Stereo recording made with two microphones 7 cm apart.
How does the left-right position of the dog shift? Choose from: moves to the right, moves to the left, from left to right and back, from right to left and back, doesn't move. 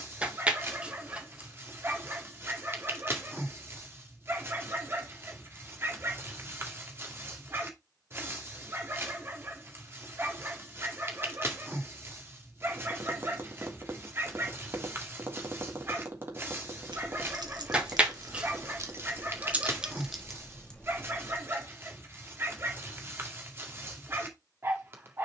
doesn't move.